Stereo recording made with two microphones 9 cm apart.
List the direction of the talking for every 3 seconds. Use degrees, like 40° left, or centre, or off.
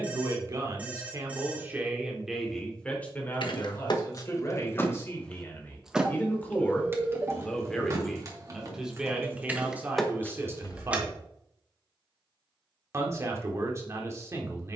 20° right, 30° left, 10° left, 20° right, 30° right.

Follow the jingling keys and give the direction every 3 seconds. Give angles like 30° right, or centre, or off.
off, 40° left, 30° right, centre, off.